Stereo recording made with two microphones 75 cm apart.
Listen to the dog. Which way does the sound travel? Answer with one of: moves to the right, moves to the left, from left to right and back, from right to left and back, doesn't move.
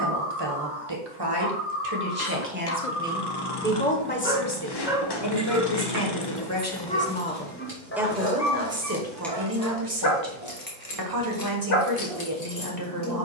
moves to the left.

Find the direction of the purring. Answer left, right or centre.
left.